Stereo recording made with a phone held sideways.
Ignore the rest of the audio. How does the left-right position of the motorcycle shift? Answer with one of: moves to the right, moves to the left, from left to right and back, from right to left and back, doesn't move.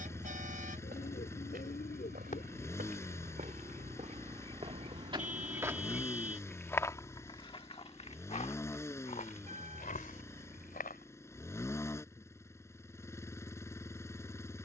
doesn't move.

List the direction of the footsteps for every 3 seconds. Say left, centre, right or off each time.
right, right, left, left, off.